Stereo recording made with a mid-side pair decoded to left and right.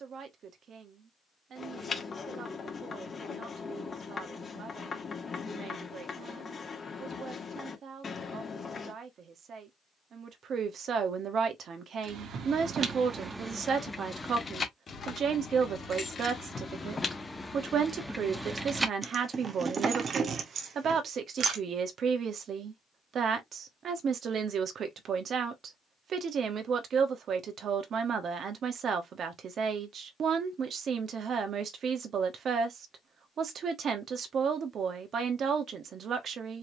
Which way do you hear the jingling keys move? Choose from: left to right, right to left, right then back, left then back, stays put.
left then back.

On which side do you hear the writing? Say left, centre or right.
left.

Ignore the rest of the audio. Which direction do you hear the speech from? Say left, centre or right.
right.